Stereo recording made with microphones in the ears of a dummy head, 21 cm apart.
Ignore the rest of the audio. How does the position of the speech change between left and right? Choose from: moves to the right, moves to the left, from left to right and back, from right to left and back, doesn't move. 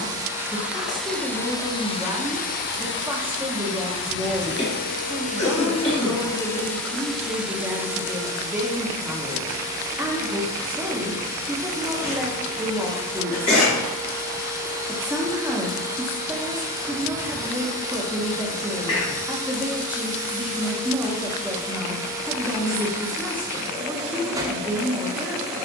doesn't move.